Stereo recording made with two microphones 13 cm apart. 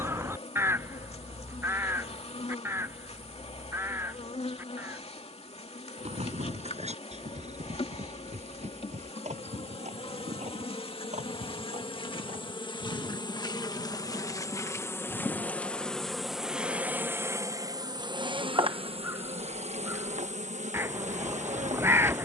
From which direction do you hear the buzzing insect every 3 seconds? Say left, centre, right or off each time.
left, left, left, left, left, centre, right, right.